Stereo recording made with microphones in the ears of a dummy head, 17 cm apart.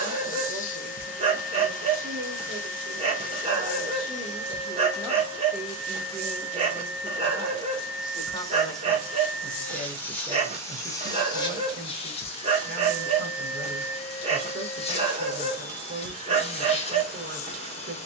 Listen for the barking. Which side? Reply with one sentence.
You can hear the barking on the right.